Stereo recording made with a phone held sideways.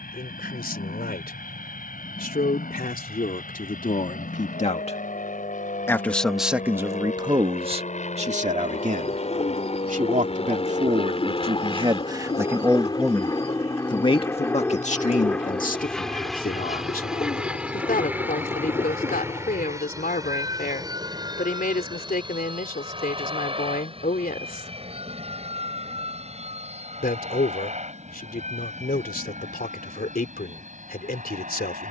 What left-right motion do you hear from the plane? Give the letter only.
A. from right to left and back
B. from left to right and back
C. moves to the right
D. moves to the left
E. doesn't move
C.